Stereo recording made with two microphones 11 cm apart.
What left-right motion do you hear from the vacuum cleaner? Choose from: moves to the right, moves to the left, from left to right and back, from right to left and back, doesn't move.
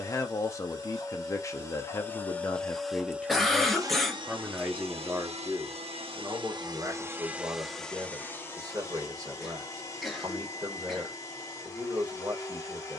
from left to right and back.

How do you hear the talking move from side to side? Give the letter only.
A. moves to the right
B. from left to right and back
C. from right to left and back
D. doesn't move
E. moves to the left
A.